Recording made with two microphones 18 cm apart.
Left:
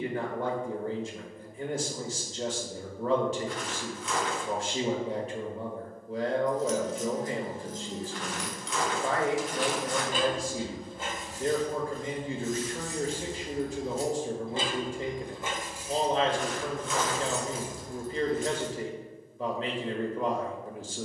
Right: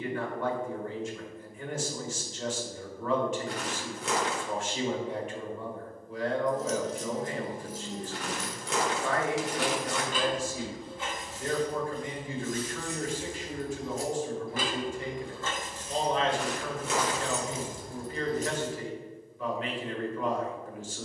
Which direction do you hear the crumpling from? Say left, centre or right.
right.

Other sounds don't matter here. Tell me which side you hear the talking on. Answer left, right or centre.
left.